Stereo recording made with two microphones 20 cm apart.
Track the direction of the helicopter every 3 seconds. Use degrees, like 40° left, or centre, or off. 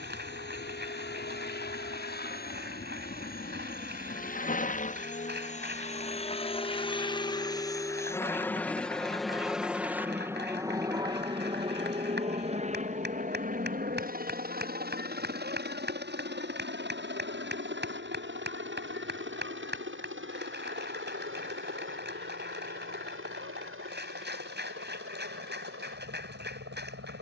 60° left, 40° left, 20° left, 10° right, 40° right, 60° right, 70° right, 70° right, 70° right.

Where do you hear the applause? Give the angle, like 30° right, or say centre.
60° right.